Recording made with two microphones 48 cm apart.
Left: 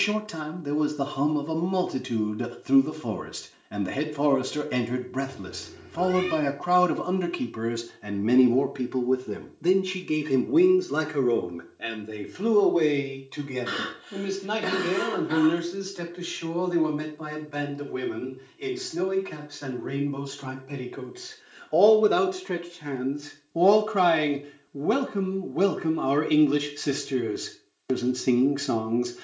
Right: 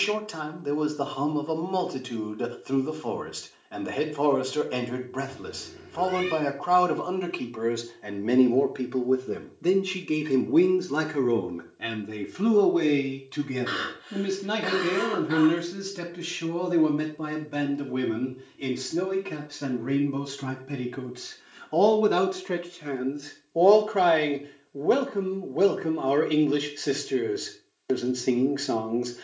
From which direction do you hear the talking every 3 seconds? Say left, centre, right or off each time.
left, left, left, centre, right, right, right, centre, left, left.